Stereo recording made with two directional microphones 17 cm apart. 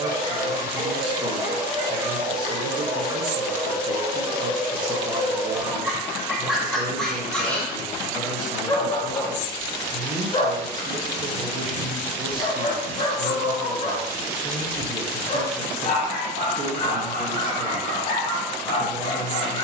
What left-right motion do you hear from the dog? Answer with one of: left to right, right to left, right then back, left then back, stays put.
right to left.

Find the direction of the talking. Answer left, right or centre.
right.